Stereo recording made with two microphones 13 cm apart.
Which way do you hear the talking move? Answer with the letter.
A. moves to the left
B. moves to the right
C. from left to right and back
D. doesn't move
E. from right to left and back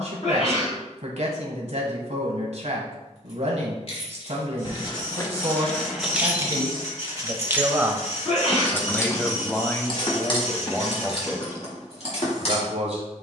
E.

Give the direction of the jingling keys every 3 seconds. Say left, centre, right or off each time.
off, left, centre, left, left.